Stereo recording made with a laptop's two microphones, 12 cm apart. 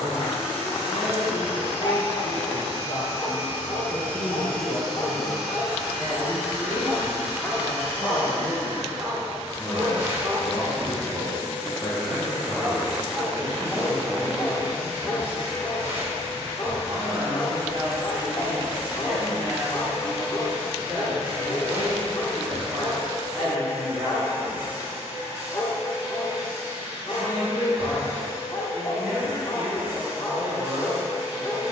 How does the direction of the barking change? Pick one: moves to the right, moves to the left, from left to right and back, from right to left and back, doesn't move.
from left to right and back.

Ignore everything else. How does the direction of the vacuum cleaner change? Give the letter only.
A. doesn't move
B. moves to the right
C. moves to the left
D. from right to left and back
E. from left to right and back
B.